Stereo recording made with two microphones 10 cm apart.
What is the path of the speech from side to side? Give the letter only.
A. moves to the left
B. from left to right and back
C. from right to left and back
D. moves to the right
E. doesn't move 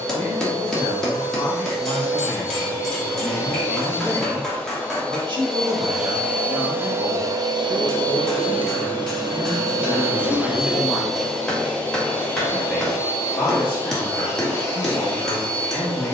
B.